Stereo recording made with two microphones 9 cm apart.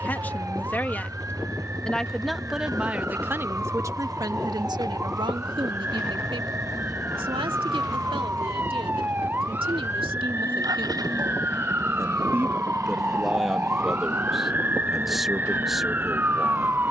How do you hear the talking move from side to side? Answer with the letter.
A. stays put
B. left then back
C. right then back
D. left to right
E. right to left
C.